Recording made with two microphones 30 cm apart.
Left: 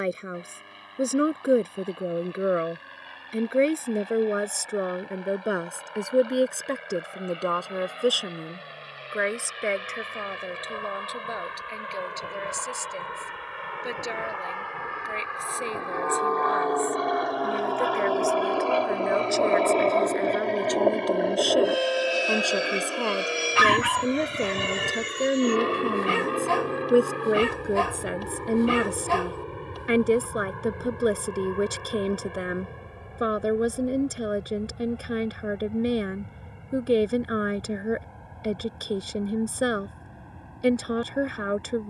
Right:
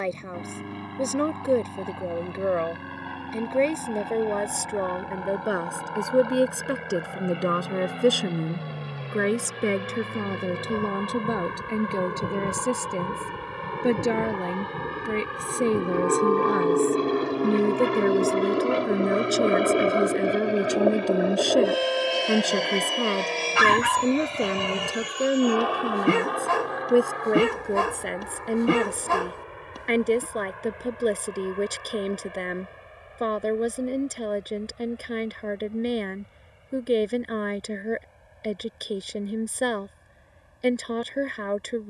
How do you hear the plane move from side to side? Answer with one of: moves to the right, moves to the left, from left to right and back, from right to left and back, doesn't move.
moves to the left.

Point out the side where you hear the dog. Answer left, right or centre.
right.